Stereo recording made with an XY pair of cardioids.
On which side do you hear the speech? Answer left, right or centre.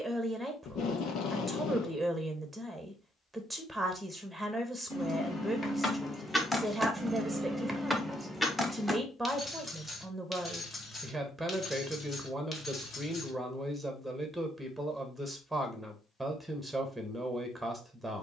centre.